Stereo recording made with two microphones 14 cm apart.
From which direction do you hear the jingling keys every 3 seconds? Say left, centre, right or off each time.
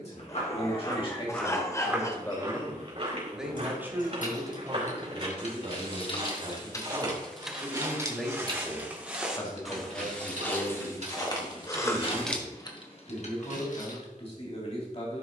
off, left, centre, right, left.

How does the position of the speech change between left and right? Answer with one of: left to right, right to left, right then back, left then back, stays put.
right then back.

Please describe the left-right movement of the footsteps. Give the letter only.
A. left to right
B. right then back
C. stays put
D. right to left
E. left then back
B.